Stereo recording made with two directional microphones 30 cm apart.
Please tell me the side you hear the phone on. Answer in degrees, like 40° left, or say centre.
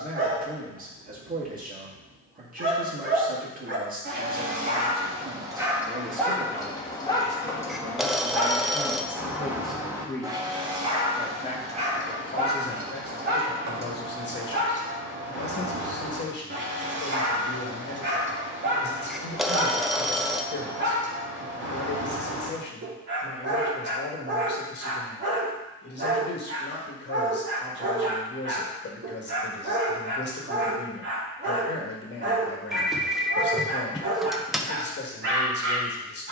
centre.